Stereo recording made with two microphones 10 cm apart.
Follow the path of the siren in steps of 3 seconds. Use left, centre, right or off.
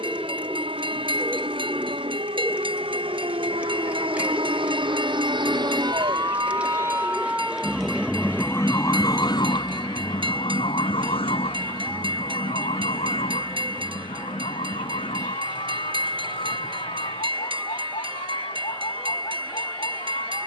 right, right, centre, left, left, left, left.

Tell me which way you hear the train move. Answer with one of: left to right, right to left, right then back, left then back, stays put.
stays put.